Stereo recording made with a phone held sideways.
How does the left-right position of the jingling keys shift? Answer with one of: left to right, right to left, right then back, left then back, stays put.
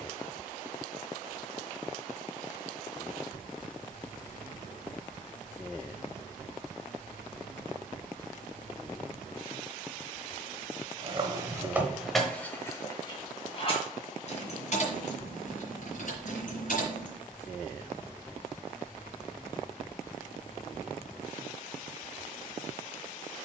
right to left.